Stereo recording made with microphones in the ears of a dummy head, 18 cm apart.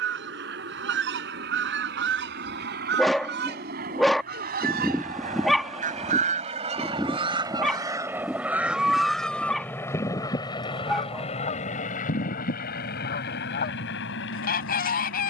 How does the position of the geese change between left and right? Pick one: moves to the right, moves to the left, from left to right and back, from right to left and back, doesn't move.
moves to the left.